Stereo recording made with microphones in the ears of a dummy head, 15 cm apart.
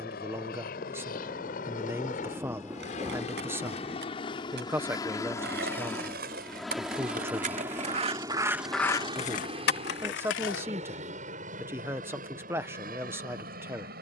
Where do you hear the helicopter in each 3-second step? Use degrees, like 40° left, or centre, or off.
50° left, 30° left, 10° right, 40° right, 50° right.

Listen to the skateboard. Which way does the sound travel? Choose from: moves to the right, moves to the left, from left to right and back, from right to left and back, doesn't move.
moves to the left.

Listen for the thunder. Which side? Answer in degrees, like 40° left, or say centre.
10° right.